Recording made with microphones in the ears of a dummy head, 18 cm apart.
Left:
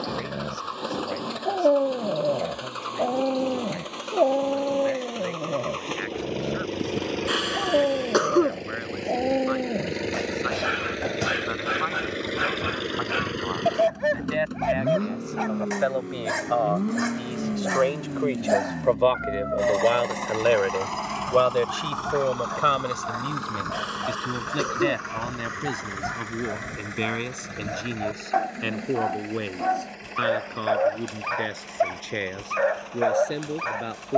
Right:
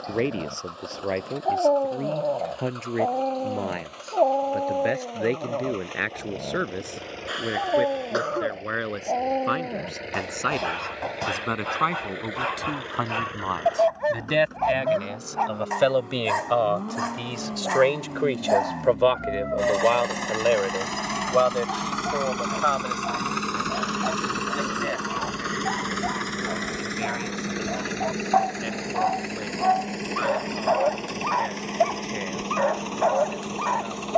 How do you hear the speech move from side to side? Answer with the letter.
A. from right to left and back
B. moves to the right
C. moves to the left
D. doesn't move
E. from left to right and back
C.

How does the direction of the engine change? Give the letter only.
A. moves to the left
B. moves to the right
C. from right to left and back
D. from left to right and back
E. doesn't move
B.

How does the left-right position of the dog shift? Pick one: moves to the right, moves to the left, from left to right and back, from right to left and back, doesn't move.
doesn't move.